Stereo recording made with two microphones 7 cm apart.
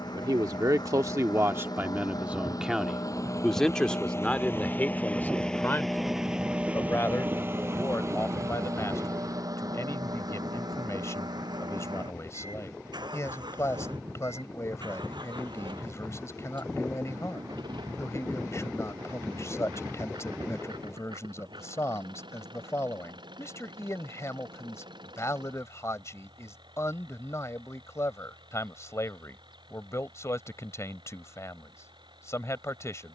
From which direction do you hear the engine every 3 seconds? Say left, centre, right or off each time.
left, left, right, right, right, right, right, right, right, right, right.